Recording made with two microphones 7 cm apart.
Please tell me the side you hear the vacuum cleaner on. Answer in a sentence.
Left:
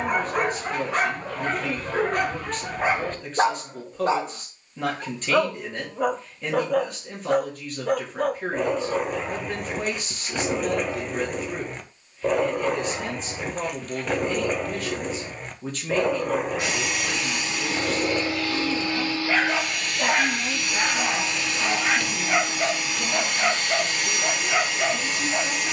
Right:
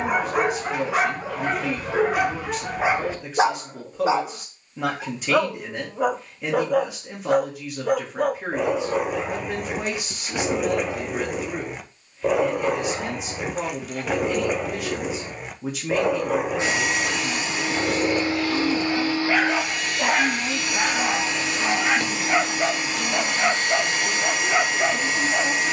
You can hear the vacuum cleaner on the right.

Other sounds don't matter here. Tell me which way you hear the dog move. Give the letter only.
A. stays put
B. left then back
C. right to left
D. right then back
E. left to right
A.